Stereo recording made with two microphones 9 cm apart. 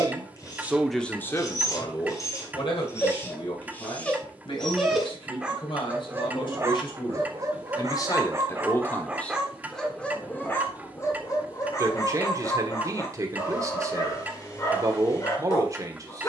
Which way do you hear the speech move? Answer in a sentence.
You can hear the speech go left and come back.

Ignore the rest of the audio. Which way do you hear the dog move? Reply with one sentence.
You can hear the dog move from left to right and back again.